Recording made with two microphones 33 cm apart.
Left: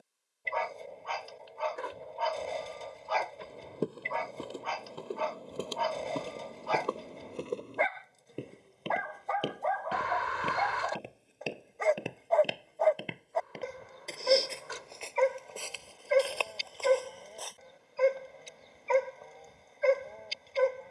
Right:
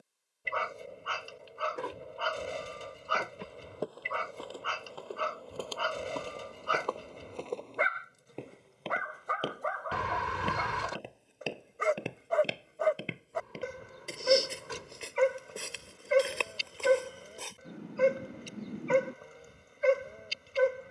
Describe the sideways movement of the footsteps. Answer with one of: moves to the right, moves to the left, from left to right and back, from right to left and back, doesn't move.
moves to the right.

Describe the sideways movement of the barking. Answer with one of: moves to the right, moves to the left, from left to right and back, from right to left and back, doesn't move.
doesn't move.